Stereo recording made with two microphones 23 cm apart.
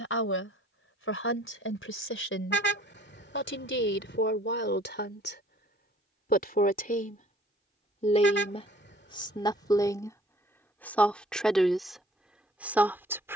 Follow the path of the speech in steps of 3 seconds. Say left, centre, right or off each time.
left, left, left, centre, centre.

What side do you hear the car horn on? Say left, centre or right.
left.